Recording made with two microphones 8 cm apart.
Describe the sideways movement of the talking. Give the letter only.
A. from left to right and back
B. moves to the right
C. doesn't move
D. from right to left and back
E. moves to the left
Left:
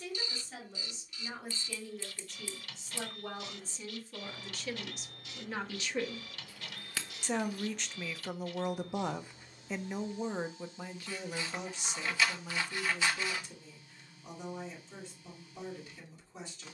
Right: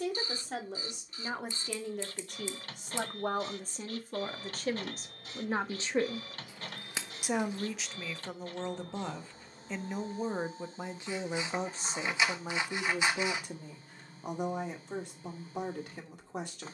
D.